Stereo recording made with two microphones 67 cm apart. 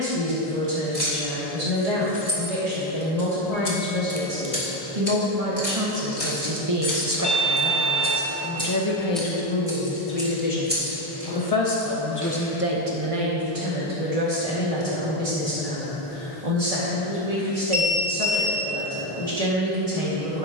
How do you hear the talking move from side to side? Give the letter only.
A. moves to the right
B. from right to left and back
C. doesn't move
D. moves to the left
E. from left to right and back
B.